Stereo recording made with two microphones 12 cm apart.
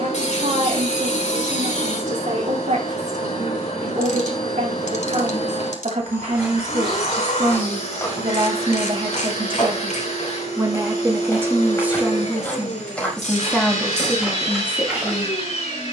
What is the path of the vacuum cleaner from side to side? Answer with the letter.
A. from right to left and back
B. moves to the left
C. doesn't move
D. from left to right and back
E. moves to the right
C.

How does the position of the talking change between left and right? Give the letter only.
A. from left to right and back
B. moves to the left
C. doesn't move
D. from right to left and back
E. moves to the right
B.